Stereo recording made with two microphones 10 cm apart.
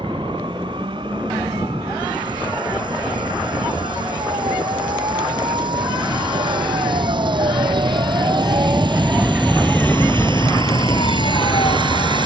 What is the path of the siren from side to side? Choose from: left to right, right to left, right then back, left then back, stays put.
right to left.